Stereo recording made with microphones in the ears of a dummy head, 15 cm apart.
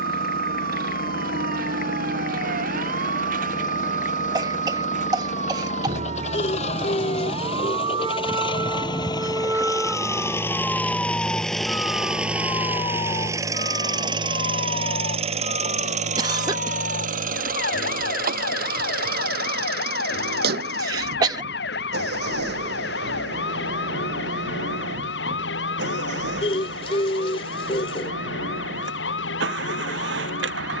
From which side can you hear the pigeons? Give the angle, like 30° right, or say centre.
30° left.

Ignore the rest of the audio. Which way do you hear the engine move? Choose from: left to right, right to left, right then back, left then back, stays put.
left to right.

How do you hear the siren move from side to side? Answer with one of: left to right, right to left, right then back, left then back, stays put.
right to left.